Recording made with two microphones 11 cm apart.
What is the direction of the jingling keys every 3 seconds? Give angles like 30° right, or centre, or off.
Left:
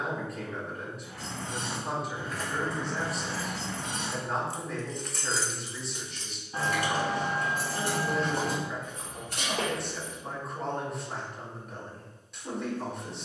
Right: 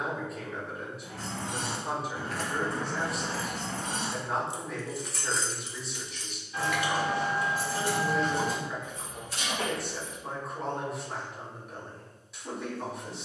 60° right, 20° right, 40° left, 60° left, off.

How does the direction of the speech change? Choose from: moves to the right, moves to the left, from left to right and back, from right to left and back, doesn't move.
doesn't move.